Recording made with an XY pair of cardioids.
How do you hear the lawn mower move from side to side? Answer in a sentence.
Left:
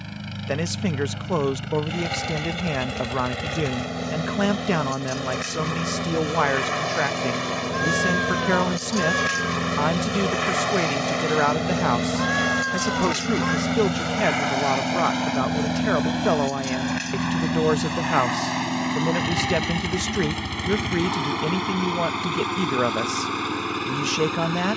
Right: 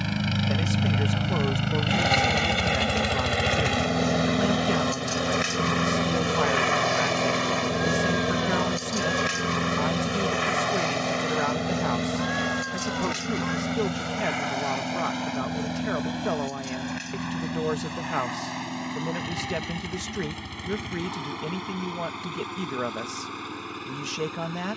In this clip you hear the lawn mower go from the right side to the left.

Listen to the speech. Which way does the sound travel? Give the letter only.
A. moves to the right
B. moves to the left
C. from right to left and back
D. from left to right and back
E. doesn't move
E.